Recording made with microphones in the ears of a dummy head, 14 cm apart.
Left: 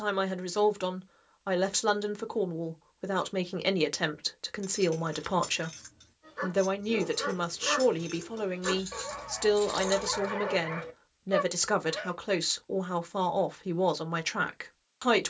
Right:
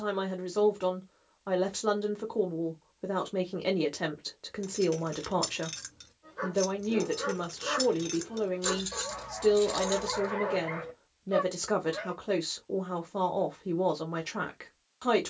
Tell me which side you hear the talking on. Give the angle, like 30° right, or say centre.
50° left.